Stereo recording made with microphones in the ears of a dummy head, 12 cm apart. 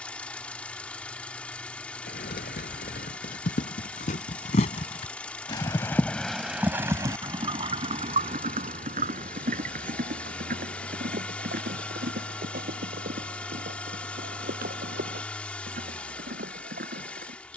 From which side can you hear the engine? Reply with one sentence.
In this clip you hear the engine in the centre.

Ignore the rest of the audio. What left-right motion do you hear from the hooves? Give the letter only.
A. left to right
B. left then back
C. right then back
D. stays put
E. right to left
A.